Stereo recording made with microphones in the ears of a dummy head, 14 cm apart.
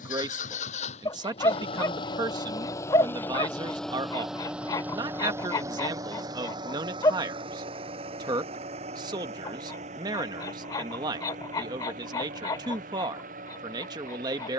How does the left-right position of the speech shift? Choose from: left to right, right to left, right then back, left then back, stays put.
stays put.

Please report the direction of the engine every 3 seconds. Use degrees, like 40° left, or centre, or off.
40° left, centre, 30° right, 50° right, 50° right.